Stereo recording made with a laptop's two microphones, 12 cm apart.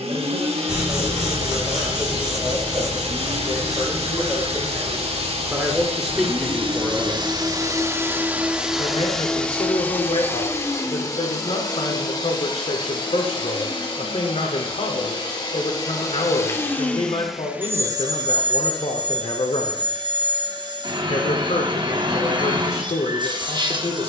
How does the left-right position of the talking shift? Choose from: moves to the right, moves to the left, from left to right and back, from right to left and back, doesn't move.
moves to the left.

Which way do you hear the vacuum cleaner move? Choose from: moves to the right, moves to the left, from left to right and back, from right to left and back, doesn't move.
from right to left and back.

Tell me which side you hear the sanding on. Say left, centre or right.
centre.